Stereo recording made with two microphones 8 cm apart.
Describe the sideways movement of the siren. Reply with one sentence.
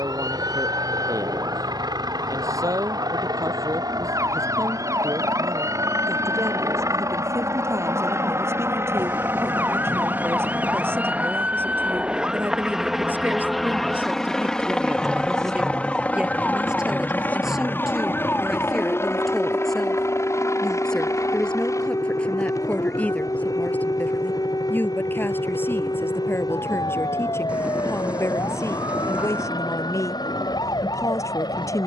In this clip you hear the siren travel towards the left.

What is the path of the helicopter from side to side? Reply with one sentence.
You can hear the helicopter go from the right side to the left.